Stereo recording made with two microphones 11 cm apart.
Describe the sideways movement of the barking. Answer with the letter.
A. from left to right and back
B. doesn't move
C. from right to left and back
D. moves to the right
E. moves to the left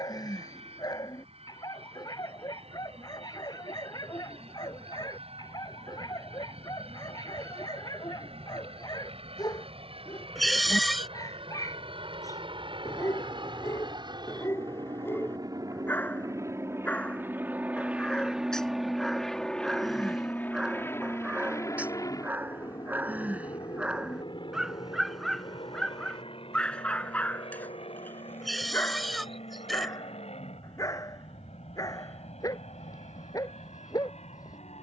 A.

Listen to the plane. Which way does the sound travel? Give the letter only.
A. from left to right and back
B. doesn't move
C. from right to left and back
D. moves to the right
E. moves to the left
E.